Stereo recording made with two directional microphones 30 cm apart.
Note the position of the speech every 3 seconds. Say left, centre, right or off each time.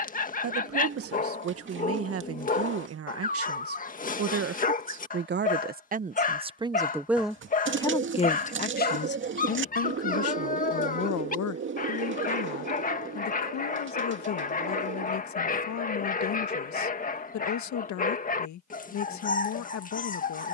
right, right, centre, left, left, left, left.